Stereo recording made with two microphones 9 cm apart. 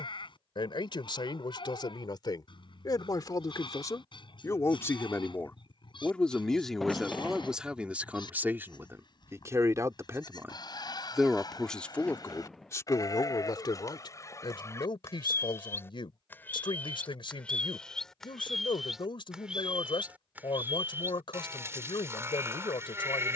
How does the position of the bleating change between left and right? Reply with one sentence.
You can hear the bleating travel towards the right.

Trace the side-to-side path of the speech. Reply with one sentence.
You can hear the speech move from left to right and back again.